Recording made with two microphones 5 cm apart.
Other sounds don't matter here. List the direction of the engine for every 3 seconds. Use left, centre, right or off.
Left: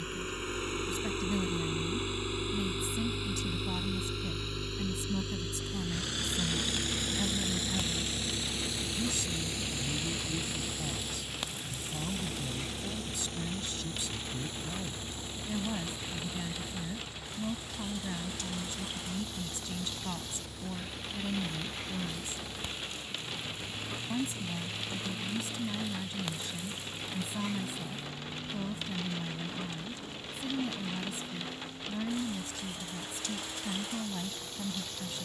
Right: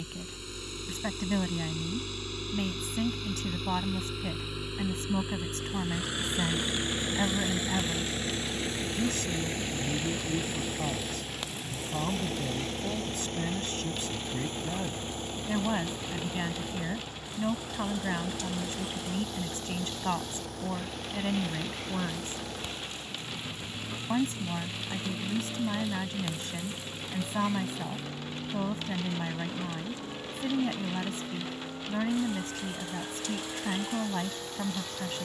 left, centre, right, right, right, right, right, right, right, right, right, right.